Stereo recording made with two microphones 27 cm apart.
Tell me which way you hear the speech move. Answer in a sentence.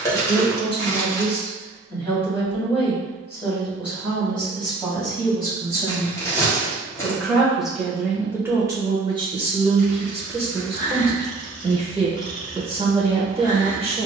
You can hear the speech go from the left side to the right.